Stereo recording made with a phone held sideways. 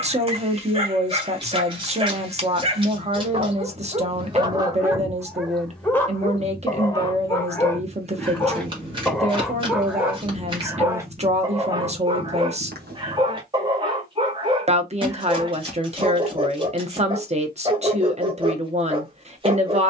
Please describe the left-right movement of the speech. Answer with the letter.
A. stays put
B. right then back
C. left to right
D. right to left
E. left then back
A.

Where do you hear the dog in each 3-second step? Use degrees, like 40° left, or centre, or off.
30° right, 20° right, 20° left, 10° right, 30° right, 30° right, 30° right.